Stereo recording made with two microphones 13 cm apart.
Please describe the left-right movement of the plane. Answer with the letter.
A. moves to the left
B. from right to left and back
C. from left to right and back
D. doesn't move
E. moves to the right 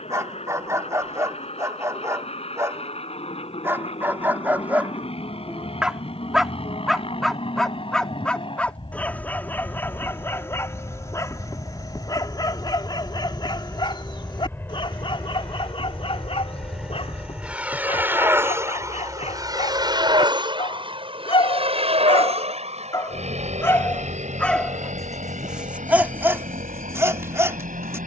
E.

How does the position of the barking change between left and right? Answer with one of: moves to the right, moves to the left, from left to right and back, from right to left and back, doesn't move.
from right to left and back.